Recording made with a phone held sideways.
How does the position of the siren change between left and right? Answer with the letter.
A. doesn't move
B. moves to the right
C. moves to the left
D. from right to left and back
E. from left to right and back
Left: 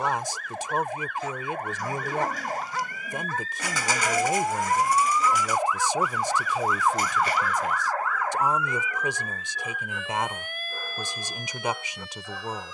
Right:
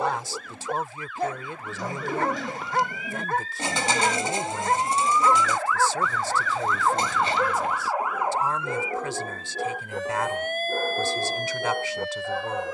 B.